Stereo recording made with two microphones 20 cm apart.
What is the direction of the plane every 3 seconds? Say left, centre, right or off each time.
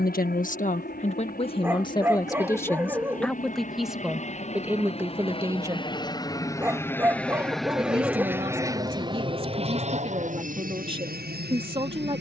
left, left, centre, right.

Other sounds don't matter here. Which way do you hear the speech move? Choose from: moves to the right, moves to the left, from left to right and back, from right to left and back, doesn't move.
moves to the right.